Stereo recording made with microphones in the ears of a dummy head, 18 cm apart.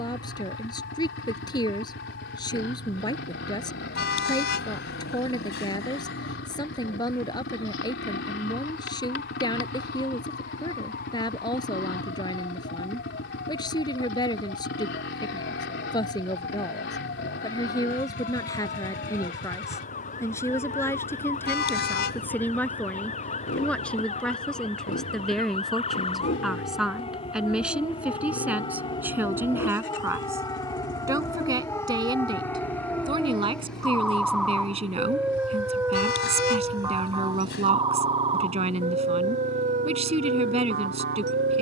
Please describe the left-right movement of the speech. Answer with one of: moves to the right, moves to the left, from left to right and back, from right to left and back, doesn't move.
moves to the right.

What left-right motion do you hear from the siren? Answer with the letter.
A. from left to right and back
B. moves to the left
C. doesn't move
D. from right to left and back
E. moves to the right
E.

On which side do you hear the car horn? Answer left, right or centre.
left.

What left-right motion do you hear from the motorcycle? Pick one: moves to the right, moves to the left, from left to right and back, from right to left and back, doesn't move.
doesn't move.